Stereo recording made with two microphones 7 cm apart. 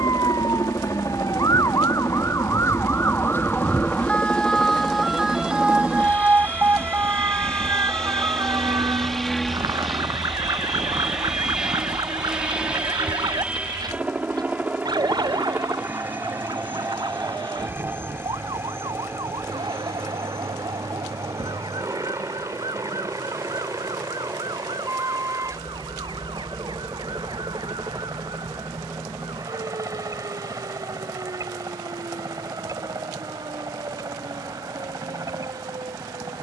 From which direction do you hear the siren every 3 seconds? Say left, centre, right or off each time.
left, centre, right, right, right, right, right, right, right, right, right, right.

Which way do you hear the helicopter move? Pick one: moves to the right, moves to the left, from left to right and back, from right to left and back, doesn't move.
moves to the right.